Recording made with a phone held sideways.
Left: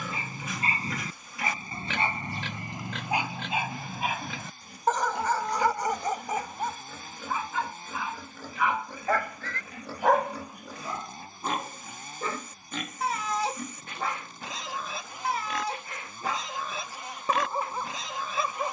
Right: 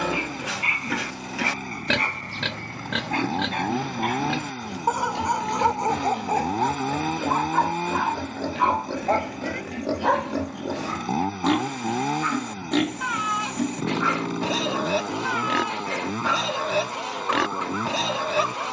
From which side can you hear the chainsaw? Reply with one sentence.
In this clip you hear the chainsaw on the right.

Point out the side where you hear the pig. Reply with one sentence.
You can hear the pig on the right.